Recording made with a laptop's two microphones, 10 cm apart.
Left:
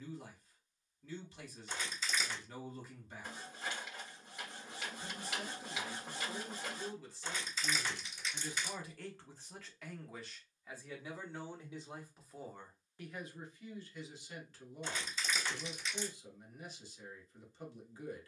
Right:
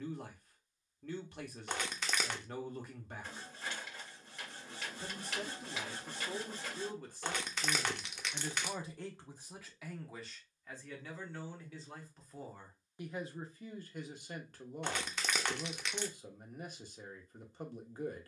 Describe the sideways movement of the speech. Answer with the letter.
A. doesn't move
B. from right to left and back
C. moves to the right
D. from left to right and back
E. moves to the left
B.